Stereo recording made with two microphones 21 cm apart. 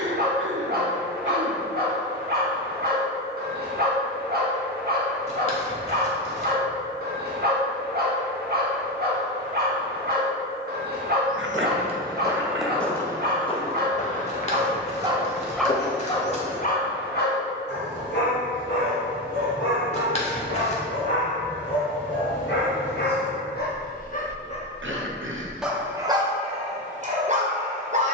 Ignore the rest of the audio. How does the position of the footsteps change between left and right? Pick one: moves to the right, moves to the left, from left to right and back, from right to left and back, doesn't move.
moves to the left.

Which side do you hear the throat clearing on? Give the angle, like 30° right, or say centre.
80° right.